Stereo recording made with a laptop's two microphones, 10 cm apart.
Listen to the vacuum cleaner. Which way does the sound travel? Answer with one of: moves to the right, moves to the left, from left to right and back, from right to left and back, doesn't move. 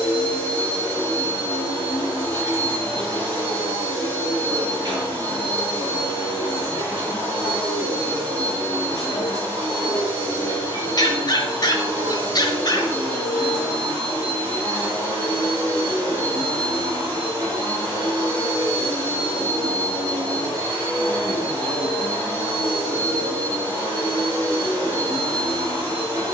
doesn't move.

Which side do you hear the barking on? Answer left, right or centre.
left.